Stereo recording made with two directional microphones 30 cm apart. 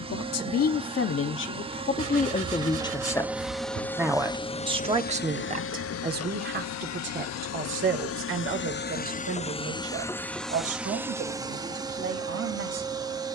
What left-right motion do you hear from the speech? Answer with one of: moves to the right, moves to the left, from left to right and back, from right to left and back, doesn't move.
moves to the right.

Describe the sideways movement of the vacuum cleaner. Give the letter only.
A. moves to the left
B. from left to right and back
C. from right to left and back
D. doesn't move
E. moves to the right
C.